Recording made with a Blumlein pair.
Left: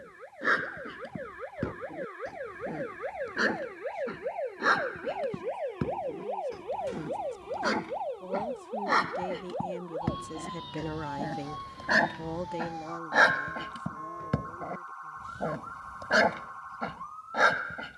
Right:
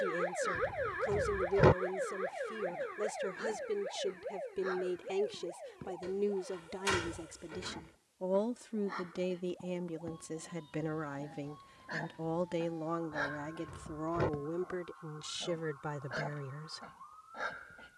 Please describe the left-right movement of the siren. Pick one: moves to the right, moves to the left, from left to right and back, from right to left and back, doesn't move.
moves to the left.